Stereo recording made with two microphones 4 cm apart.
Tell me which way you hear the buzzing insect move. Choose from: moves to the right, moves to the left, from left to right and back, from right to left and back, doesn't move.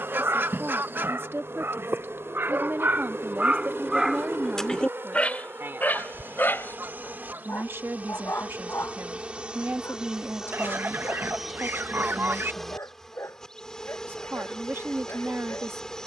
moves to the left.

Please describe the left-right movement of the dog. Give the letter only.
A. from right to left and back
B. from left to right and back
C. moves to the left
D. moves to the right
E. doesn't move
C.